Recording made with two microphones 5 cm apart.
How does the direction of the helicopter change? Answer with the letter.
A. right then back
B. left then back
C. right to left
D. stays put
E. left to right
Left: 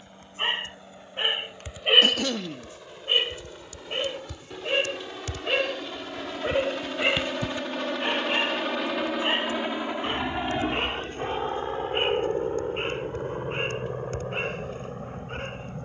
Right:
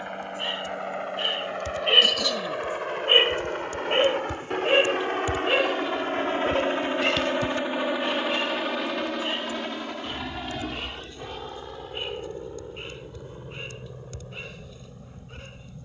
C.